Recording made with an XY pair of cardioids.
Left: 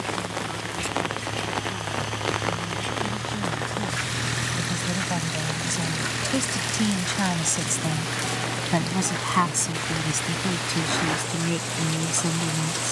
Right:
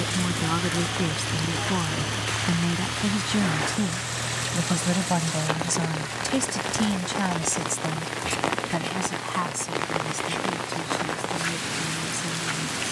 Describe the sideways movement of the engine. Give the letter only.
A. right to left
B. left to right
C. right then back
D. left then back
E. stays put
A.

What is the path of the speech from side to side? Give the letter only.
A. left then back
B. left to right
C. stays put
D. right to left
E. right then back
D.